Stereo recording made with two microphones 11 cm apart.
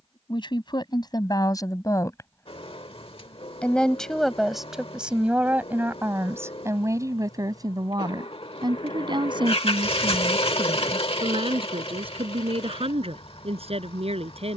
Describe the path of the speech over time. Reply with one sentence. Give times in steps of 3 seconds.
In this clip you hear the speech on the left from 0 s, in the centre from 3 s and on the right from 6 s.